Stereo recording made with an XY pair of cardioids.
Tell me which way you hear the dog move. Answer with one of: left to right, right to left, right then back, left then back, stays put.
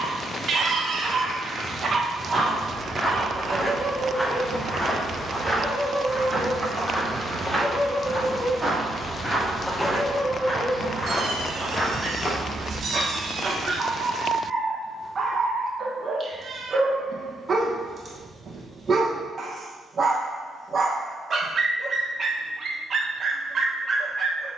left then back.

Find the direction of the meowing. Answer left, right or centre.
right.